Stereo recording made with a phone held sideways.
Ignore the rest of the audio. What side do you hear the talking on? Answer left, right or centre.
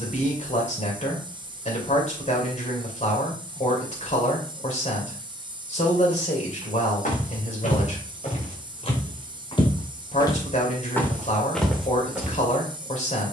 left.